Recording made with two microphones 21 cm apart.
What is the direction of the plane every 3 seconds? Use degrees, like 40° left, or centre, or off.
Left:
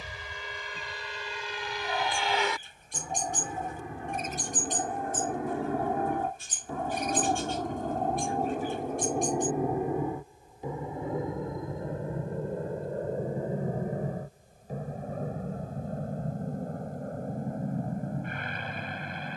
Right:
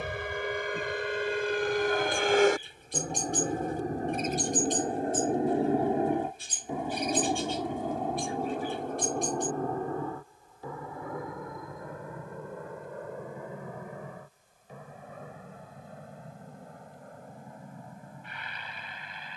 60° right, 40° right, 10° right, 20° left, 30° left, 40° left, 50° left.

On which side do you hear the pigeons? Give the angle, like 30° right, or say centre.
50° left.